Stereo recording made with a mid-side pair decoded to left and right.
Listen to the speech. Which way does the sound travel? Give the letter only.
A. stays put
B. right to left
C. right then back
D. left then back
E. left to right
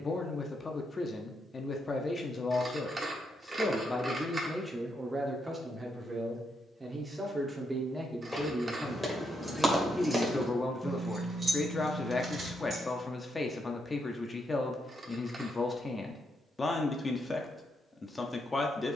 C.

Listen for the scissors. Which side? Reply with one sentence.
You can hear the scissors on the right.